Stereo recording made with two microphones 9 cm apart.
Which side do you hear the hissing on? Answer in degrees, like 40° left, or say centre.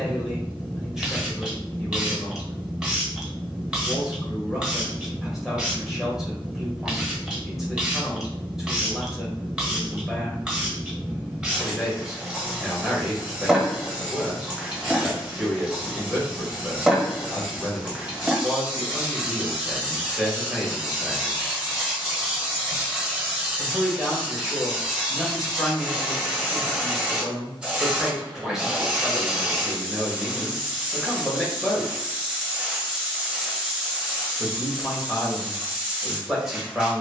10° right.